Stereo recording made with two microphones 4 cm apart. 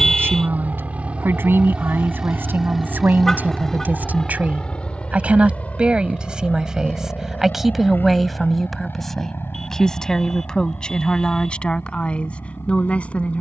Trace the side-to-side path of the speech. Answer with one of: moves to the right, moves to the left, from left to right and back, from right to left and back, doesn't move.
moves to the left.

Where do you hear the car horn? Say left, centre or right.
centre.